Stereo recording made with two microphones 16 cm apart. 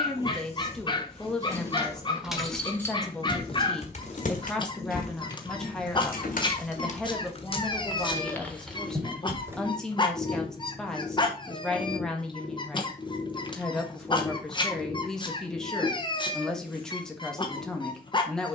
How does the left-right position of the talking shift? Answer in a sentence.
In this clip you hear the talking stay put.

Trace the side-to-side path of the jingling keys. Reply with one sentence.
In this clip you hear the jingling keys go left and come back.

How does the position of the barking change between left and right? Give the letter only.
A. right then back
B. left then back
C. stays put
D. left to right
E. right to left
C.